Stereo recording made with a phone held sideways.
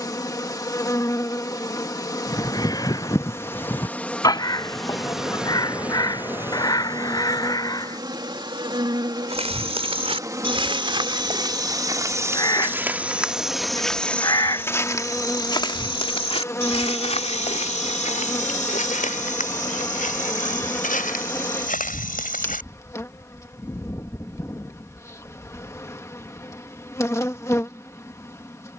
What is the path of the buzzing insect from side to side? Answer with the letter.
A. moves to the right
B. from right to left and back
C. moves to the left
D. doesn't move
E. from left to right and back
E.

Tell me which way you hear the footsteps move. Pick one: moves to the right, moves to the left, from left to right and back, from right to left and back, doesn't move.
moves to the left.